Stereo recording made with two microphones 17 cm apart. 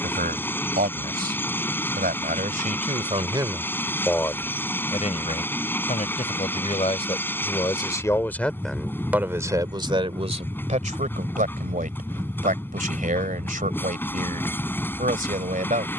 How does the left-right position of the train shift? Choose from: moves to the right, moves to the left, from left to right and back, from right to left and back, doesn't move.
doesn't move.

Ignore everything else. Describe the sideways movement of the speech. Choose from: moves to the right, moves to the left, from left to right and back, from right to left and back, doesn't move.
from right to left and back.